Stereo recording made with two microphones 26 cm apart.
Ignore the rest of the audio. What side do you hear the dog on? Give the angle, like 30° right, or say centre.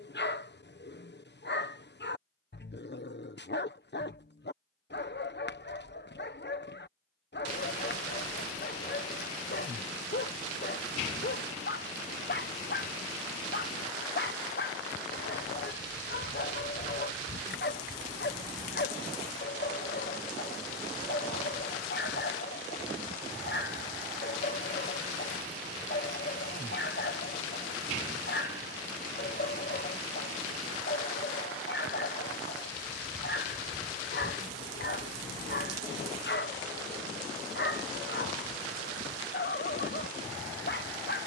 40° left.